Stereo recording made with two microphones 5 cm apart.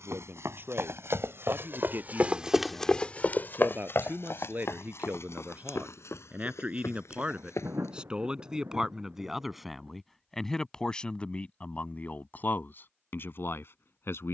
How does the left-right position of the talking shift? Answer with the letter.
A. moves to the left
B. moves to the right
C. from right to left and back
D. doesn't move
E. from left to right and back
A.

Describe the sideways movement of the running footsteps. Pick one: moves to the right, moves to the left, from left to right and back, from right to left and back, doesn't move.
moves to the left.